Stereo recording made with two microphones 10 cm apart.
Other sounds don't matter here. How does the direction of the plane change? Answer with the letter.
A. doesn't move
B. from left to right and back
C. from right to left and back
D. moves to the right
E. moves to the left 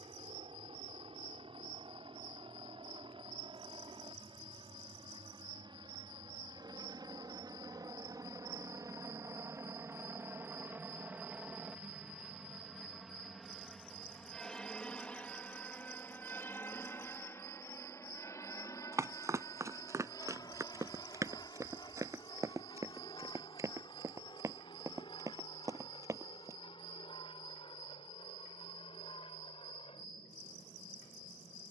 E.